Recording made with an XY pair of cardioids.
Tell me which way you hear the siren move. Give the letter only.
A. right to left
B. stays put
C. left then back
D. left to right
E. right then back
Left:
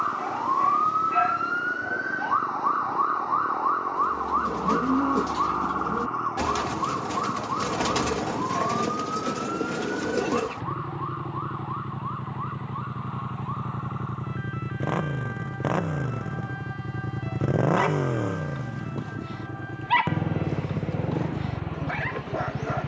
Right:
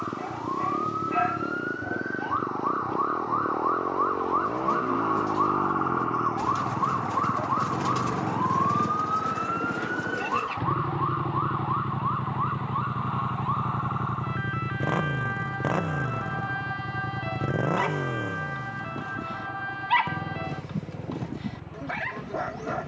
D.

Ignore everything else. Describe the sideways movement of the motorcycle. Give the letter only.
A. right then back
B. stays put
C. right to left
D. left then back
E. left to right
C.